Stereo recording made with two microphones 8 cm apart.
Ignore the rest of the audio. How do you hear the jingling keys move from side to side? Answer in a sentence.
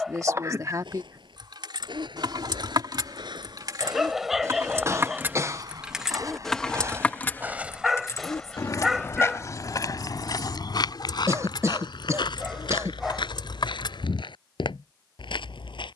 You can hear the jingling keys move to the left.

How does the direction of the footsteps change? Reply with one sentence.
In this clip you hear the footsteps move to the left.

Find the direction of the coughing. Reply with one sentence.
You can hear the coughing on the right.